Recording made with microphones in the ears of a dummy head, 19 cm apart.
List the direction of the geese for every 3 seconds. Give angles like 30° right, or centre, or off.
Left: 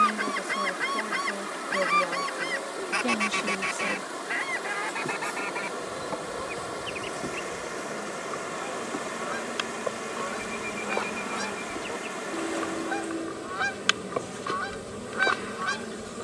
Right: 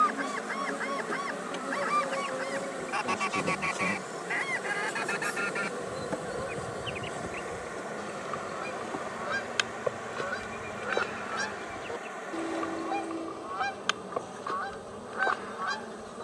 50° left, centre, 30° right, 20° right, 30° left, 40° left.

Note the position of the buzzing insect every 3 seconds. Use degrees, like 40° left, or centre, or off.
60° right, 30° right, centre, 30° left, 30° left, 30° left.